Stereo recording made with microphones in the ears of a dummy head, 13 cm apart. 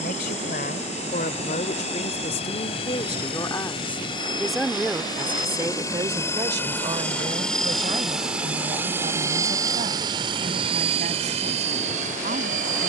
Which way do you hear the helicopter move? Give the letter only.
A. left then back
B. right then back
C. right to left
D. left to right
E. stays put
D.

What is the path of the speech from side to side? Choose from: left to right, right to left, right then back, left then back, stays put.
left to right.